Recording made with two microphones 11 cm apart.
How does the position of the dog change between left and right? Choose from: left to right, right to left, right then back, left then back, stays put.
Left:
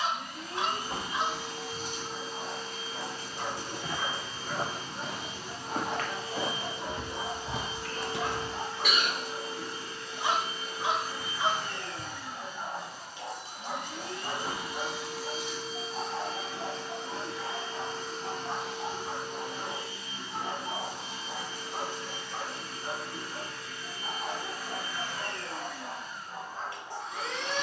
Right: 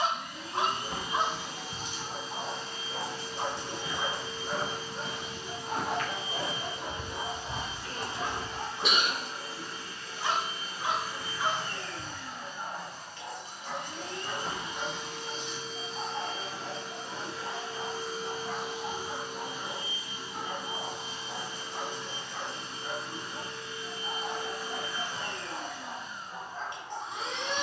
right to left.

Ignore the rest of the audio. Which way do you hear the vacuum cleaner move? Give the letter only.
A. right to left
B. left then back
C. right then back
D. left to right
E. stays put
D.